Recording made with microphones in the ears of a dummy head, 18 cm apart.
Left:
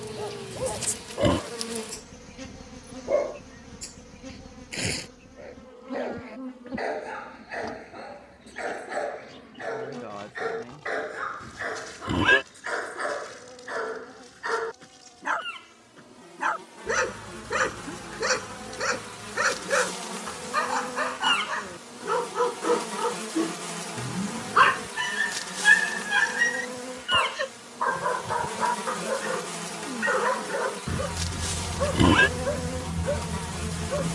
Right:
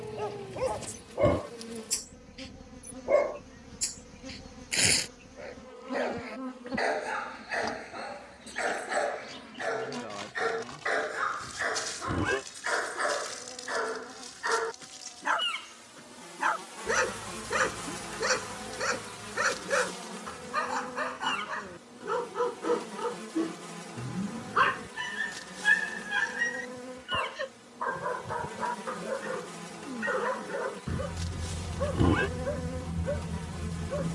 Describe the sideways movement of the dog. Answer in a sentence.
You can hear the dog move from right to left.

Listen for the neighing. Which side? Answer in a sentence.
You can hear the neighing on the left.